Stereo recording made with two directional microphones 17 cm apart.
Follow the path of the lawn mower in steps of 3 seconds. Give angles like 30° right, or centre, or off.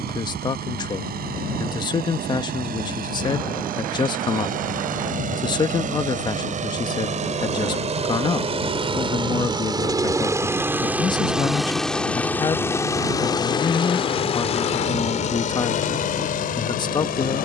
60° right, 60° right, 40° right, 10° right, 30° left, 50° left.